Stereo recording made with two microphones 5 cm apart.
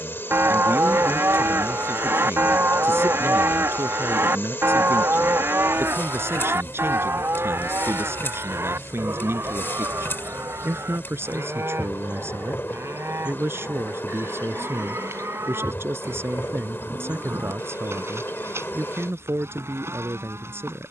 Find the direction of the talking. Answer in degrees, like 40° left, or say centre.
70° right.